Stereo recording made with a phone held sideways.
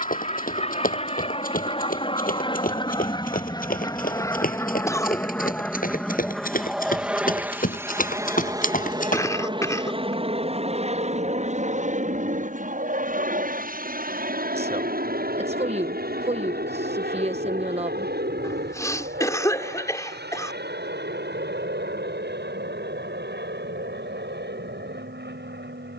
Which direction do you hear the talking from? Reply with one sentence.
In this clip you hear the talking on the right.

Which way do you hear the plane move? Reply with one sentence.
In this clip you hear the plane move to the right.